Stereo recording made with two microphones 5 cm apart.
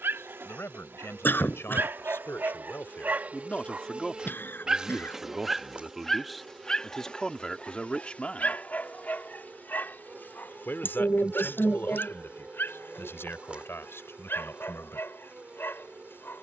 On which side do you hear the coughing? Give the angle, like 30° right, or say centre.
50° left.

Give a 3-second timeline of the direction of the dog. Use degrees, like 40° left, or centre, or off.
50° right, 20° right, 30° left, 50° left, 50° left, 60° left.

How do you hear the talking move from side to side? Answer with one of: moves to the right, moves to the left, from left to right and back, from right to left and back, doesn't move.
from left to right and back.